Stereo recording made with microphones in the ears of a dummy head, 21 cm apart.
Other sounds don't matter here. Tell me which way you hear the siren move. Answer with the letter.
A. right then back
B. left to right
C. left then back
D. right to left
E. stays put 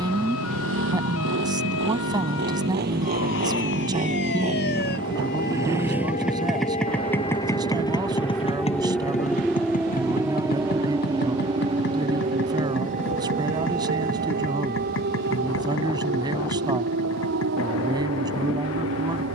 B.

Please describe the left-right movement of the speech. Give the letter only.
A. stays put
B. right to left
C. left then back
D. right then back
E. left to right
A.